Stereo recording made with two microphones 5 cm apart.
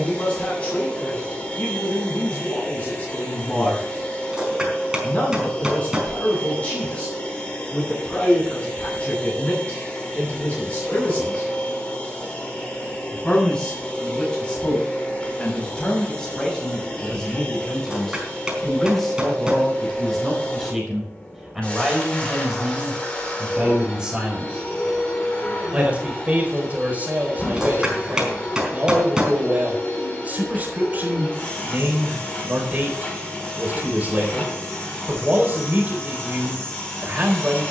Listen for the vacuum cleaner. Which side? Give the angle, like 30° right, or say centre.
20° left.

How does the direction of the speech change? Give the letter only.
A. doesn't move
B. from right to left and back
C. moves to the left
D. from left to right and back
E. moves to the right
E.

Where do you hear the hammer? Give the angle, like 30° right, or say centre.
10° right.